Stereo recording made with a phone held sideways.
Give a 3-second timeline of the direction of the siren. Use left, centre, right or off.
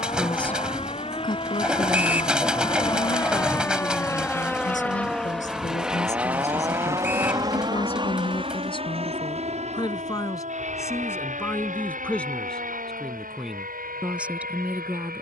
left, centre, right, right, right.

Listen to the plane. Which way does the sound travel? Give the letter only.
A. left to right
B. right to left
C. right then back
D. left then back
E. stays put
A.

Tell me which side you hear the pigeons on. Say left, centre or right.
centre.